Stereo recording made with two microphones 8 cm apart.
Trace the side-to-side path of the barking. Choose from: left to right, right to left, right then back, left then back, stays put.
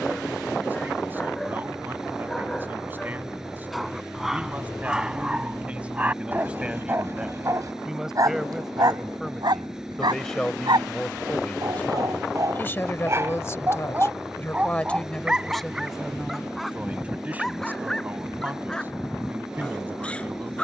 right then back.